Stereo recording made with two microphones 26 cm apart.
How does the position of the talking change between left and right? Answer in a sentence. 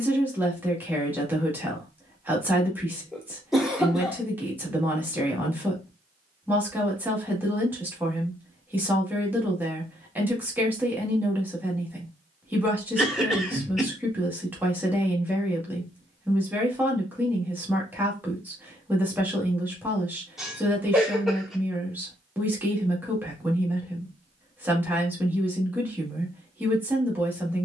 In this clip you hear the talking stay put.